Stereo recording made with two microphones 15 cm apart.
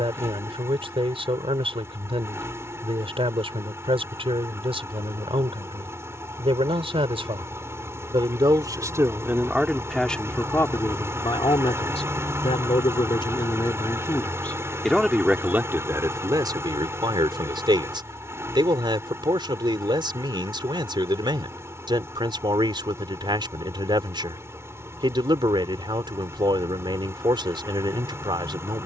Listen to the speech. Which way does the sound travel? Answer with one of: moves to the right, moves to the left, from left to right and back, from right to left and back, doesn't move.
from right to left and back.